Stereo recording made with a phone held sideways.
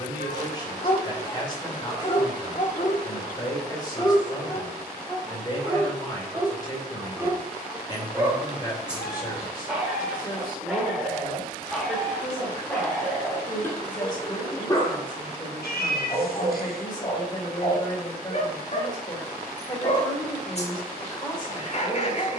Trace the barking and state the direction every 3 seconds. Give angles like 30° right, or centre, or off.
40° left, 10° left, 10° right, centre, 10° left, 40° left, 40° left, 40° left.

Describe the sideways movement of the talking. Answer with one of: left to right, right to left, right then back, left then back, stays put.
stays put.